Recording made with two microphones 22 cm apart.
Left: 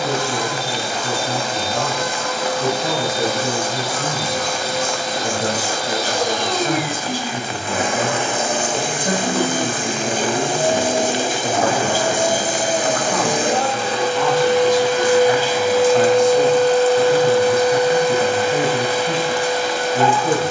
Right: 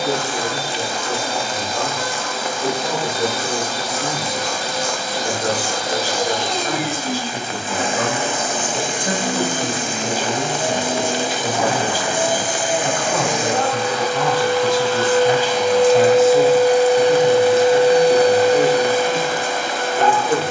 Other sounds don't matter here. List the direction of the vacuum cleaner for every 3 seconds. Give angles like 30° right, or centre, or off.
70° left, 60° left, 60° left, 50° left, 30° left, 10° right, 50° right.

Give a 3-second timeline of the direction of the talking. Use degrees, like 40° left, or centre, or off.
30° left, 30° left, 10° left, 10° right, 20° right, centre, 30° left.